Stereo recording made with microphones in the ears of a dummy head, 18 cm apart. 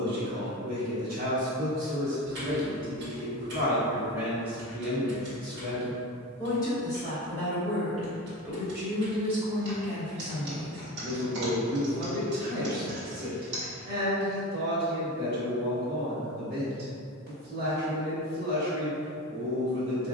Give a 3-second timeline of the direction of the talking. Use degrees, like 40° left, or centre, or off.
40° right, 10° right, centre, 40° right, 50° right, 50° right, 50° right.